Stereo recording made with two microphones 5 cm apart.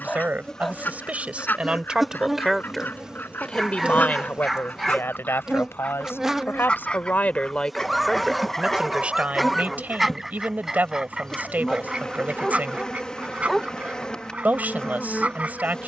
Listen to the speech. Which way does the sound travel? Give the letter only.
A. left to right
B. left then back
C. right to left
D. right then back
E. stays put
B.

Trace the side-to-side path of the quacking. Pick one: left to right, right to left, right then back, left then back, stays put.
left to right.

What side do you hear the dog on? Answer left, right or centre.
centre.